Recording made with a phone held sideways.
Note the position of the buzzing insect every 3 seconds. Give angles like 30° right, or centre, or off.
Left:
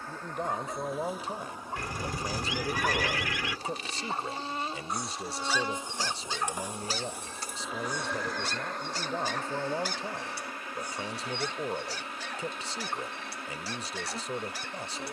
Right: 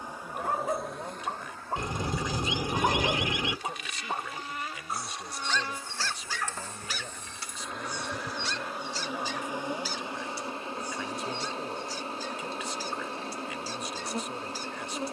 centre, 30° left, 10° left, 20° right, 30° right.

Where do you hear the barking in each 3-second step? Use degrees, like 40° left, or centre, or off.
40° right, 10° right, 40° left, 70° left, 70° left.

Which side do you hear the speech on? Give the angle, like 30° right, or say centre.
30° left.